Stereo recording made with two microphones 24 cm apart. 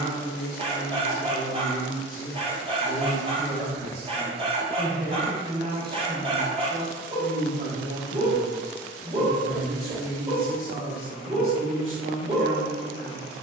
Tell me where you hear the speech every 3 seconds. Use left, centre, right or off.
left, centre, right, right, right.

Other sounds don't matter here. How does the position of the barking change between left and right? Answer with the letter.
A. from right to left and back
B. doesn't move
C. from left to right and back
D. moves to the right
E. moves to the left
B.